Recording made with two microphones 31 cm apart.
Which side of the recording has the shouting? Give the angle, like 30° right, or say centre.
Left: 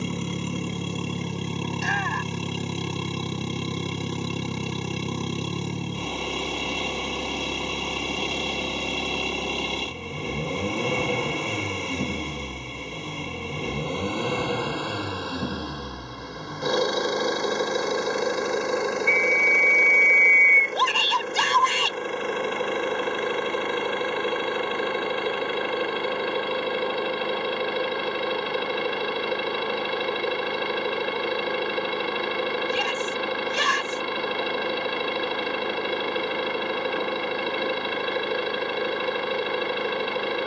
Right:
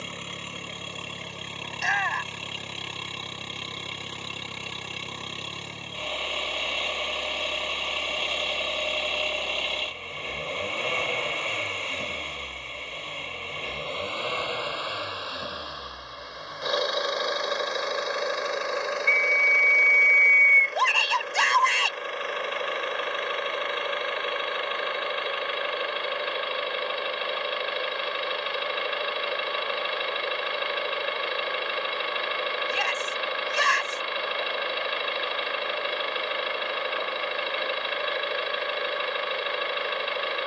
50° left.